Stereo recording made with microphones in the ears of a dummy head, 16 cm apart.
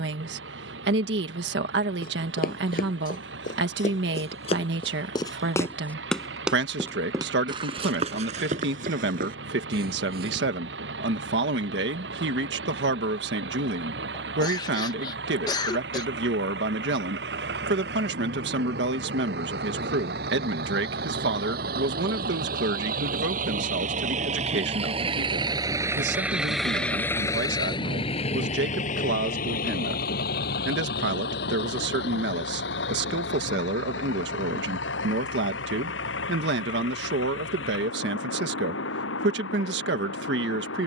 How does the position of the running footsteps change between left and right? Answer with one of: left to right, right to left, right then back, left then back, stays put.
left to right.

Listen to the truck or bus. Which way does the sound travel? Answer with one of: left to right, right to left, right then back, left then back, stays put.
right to left.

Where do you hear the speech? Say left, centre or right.
right.